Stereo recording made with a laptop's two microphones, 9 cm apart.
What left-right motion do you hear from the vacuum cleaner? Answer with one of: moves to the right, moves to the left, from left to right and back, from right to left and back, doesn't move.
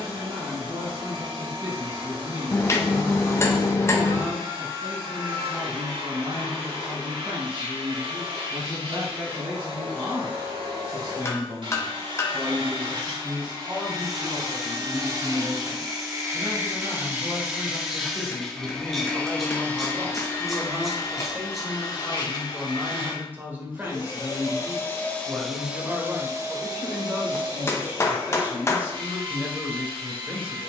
from right to left and back.